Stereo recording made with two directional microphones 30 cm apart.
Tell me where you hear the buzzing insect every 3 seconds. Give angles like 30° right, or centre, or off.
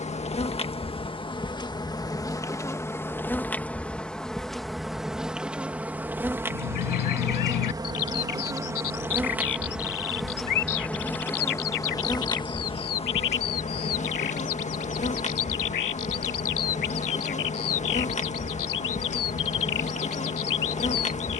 10° left, centre, 10° right, centre, 20° left, 20° left, 20° left.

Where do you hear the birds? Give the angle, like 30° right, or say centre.
70° left.